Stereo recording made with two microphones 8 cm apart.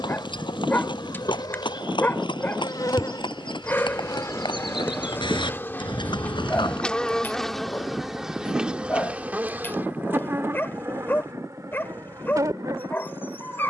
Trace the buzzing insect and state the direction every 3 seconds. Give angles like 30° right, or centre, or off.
60° left, 40° left, centre, 30° right, 50° right.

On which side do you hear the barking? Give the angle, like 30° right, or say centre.
30° left.